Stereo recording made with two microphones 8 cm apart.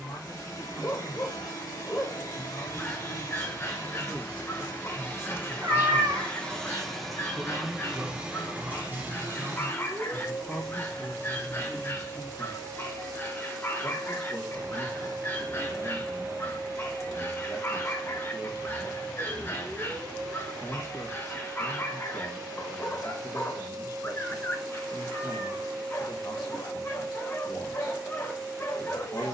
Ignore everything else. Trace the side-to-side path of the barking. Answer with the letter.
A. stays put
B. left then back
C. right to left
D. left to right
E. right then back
A.